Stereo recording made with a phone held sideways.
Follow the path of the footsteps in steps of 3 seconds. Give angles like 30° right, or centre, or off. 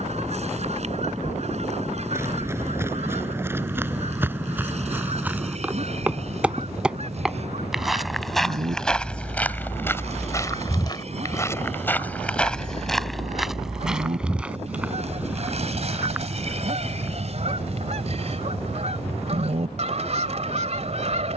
20° right, 10° right, centre, 20° left, centre, 10° right, off.